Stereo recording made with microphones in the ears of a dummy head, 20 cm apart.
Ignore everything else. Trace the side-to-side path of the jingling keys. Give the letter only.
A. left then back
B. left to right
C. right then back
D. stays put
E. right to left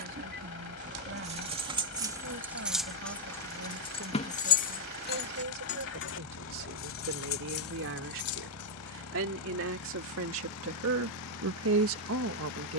E.